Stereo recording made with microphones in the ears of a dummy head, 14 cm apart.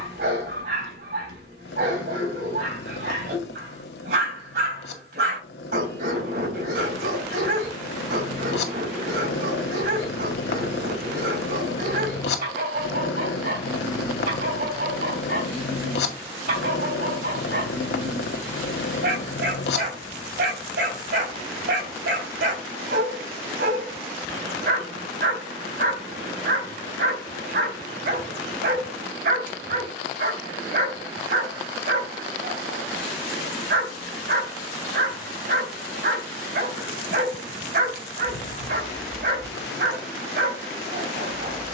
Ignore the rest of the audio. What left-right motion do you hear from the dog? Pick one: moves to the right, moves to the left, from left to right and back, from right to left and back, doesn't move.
doesn't move.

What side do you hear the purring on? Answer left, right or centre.
left.